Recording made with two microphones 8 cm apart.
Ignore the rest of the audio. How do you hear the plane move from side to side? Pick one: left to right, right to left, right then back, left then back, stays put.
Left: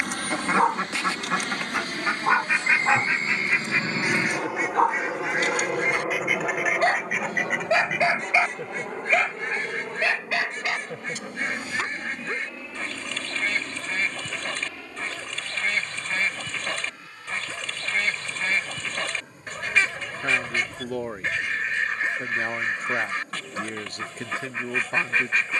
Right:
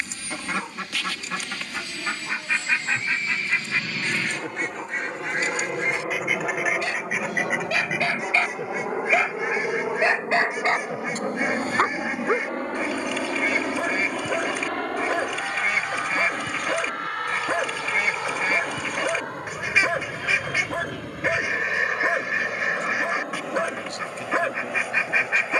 left to right.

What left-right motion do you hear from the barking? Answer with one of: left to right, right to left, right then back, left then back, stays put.
left to right.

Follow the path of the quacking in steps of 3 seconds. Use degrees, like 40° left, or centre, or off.
20° left, 10° left, centre, 10° right, 10° right, 10° right, 10° right, 10° right, 10° right.